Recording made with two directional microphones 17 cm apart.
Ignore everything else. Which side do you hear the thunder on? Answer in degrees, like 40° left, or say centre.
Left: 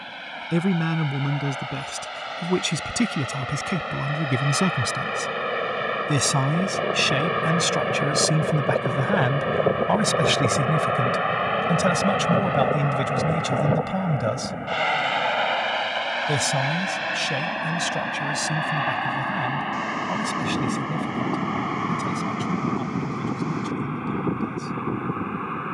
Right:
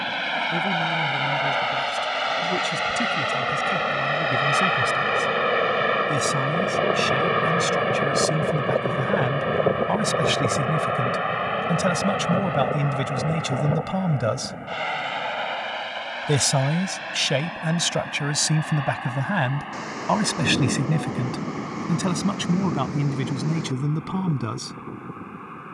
30° right.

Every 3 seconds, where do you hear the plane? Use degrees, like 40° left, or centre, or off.
50° right, 40° right, 20° right, centre, 20° left, 30° left, 40° left, 40° left, 50° left.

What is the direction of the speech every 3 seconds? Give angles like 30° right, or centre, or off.
50° left, 40° left, 30° left, 10° left, 10° right, 30° right, 50° right, 60° right, 70° right.